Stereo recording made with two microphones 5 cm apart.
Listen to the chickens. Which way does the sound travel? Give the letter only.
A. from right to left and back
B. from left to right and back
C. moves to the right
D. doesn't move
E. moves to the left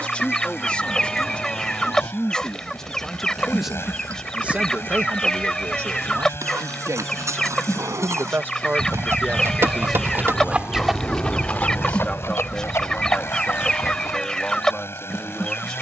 D.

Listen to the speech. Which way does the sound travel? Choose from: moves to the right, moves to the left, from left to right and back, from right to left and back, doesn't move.
from left to right and back.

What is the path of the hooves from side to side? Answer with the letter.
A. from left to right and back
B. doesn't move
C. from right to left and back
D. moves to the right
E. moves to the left
E.